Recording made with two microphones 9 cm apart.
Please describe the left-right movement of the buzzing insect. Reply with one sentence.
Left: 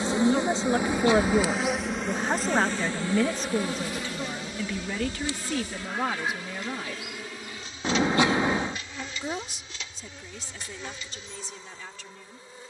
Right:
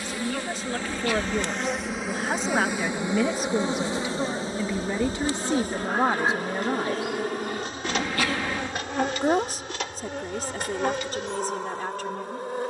You can hear the buzzing insect move to the right.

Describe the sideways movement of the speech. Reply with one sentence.
In this clip you hear the speech travel towards the right.